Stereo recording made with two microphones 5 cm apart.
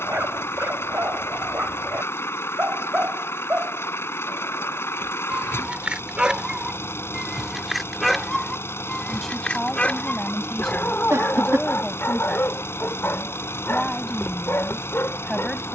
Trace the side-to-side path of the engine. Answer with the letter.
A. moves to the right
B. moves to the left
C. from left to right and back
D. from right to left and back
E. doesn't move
E.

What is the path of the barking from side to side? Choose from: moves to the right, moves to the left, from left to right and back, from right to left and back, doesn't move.
moves to the left.